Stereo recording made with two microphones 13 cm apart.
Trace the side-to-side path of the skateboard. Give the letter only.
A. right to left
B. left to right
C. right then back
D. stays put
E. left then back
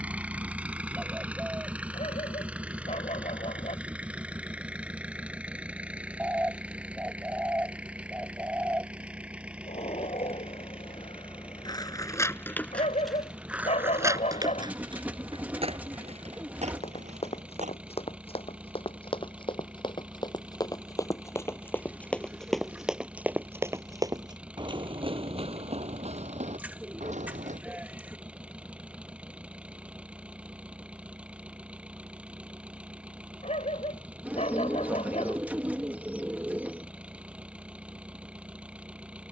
B.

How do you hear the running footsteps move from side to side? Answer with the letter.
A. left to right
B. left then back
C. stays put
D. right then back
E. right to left
A.